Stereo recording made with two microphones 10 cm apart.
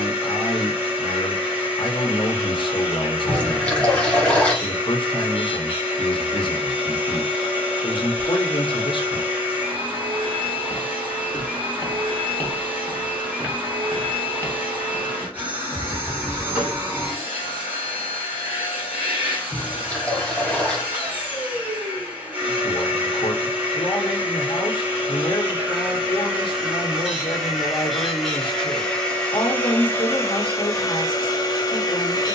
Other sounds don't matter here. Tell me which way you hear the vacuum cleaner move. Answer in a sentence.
You can hear the vacuum cleaner move to the left.